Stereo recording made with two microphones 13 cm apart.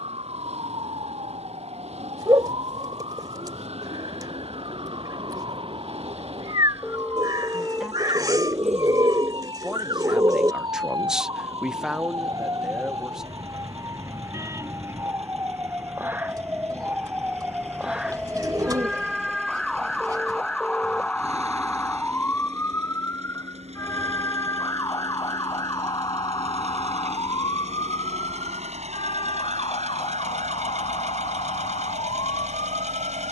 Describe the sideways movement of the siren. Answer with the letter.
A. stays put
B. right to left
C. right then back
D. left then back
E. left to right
B.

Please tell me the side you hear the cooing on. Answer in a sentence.
In this clip you hear the cooing on the right.